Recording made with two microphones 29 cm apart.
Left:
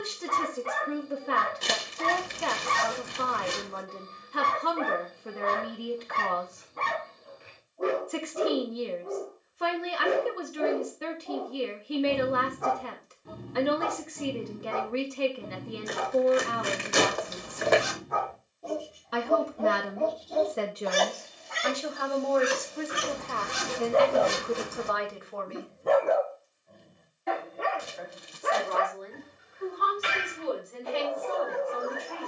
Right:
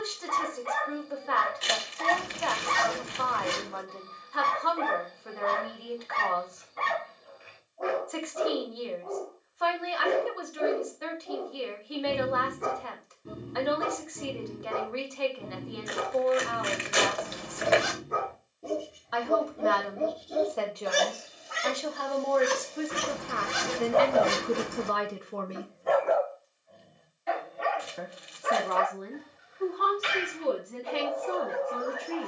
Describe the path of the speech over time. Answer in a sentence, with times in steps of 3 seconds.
You can hear the speech on the left from 0 s, in the centre from 21 s and on the right from 24 s.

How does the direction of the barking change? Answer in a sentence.
You can hear the barking move from left to right and back again.